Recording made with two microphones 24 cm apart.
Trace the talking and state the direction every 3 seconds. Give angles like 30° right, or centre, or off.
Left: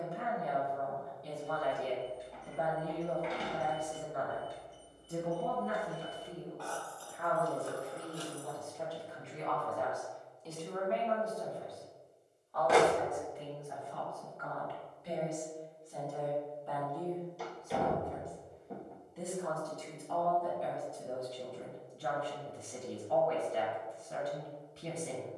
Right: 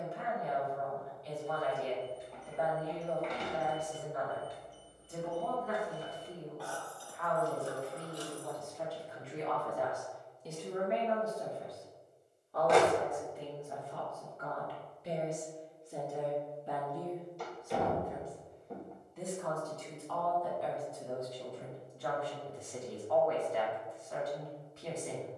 40° left, 40° left, 20° left, 10° right, 40° right, 20° right, 10° left, 30° left, 30° left.